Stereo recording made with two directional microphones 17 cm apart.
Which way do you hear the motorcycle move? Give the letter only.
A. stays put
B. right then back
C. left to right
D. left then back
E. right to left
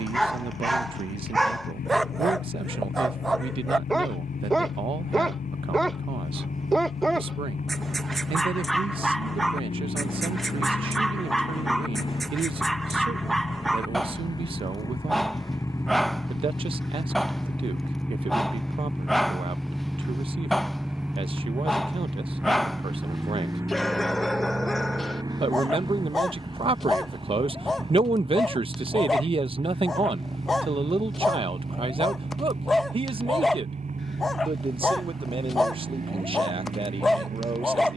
C.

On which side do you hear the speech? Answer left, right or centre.
right.